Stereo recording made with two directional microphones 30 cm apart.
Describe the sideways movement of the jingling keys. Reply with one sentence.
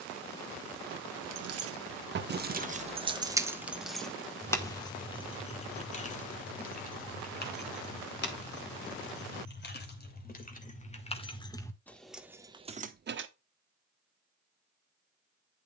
You can hear the jingling keys go left and come back.